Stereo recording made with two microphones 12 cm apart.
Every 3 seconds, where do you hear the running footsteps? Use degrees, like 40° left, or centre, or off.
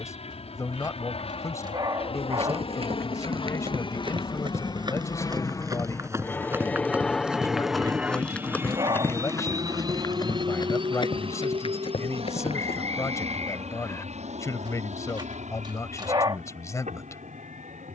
50° right, 40° right, centre, 40° left, 50° left, off.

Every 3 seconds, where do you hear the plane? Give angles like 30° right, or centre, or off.
60° left, 40° left, centre, 40° right, 60° right, 70° right.